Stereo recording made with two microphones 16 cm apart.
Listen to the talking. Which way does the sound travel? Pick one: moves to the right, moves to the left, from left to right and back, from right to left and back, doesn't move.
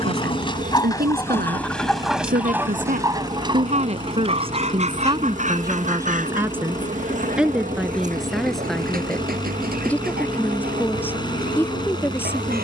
moves to the left.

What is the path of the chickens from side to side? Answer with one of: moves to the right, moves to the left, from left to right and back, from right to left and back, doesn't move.
moves to the right.